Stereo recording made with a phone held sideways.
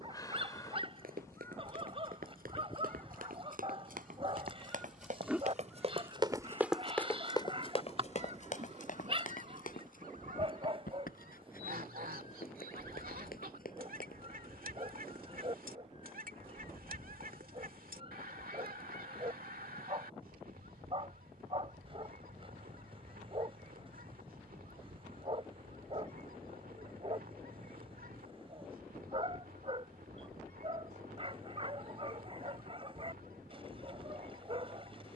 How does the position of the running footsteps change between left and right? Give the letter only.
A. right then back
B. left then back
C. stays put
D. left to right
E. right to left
E.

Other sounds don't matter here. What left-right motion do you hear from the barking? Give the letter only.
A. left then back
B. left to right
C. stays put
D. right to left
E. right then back
C.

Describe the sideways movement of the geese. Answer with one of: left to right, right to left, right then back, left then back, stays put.
left to right.